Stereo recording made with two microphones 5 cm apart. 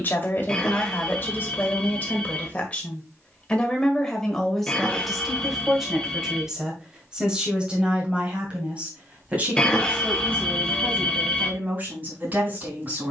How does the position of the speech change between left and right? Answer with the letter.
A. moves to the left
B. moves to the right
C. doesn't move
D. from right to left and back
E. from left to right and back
B.